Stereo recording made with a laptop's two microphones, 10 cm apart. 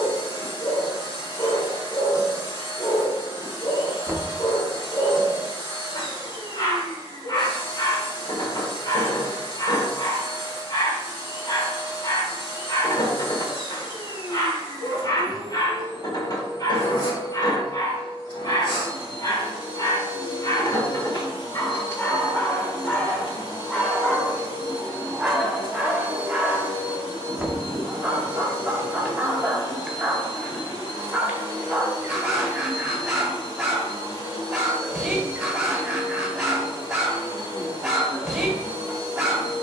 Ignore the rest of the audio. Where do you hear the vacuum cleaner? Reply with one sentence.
In this clip you hear the vacuum cleaner on the left.